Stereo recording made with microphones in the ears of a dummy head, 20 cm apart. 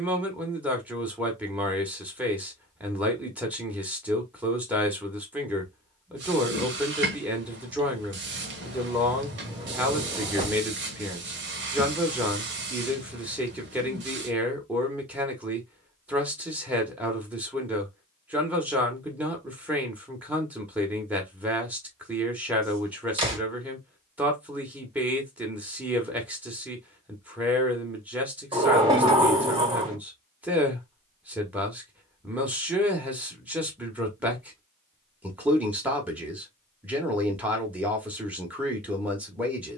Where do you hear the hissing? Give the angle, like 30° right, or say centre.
50° right.